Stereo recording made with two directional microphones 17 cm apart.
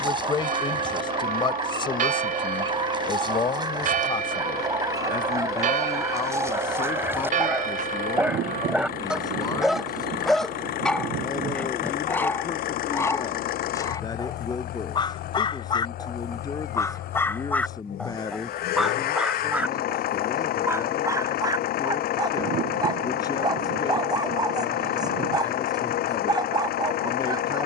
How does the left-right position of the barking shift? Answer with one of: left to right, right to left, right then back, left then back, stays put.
left then back.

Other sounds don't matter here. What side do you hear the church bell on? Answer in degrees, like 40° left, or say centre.
50° right.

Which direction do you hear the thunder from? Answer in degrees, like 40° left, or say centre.
70° right.